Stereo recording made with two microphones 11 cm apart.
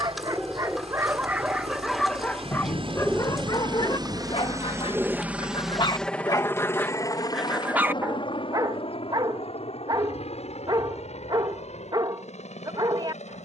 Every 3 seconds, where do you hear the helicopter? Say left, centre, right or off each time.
right, right, left, left, left.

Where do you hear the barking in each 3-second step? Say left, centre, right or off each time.
centre, left, centre, right, right.